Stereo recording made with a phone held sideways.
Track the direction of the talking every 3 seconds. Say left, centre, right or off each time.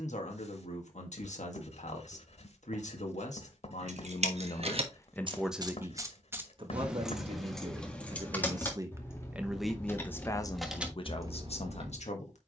left, left, right, left.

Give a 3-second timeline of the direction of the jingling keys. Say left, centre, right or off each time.
off, right, centre, centre.